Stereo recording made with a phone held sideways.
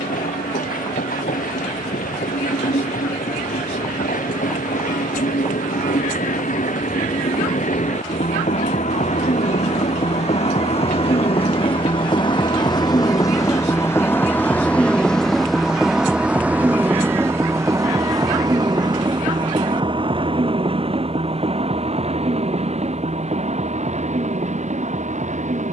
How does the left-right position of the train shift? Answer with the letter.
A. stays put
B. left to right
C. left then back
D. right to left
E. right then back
B.